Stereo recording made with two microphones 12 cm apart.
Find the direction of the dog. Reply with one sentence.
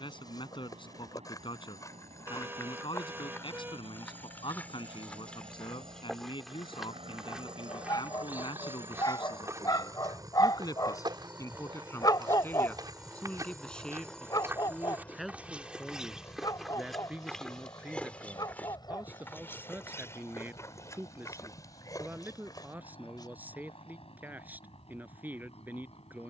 In this clip you hear the dog on the left.